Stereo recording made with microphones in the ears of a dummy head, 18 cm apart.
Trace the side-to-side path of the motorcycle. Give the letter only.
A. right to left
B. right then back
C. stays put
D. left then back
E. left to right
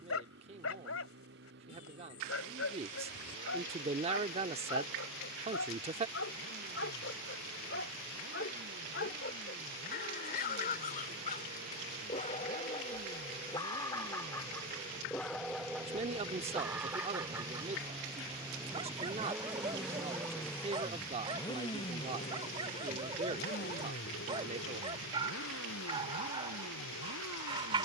A.